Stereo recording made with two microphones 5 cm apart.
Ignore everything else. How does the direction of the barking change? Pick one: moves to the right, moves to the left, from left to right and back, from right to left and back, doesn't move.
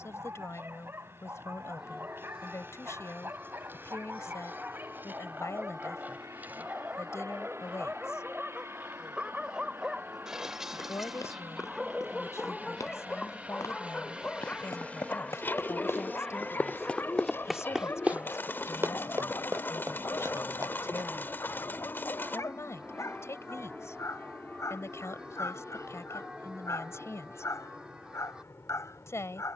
moves to the left.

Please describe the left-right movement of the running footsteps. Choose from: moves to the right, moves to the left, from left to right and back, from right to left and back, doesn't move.
moves to the right.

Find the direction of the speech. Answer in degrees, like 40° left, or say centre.
60° left.